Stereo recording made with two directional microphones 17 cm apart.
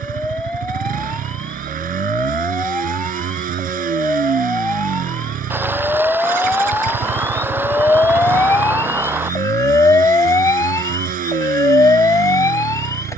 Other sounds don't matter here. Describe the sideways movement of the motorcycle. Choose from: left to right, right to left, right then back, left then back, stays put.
stays put.